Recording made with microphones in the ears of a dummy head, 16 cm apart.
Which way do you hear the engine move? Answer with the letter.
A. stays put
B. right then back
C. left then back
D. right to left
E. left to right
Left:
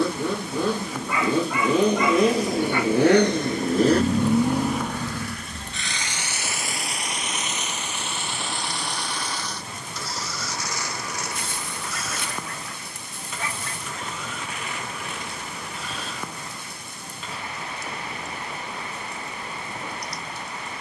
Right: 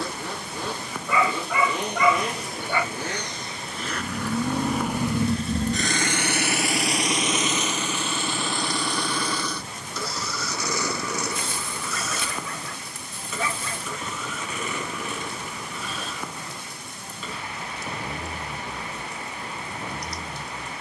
E.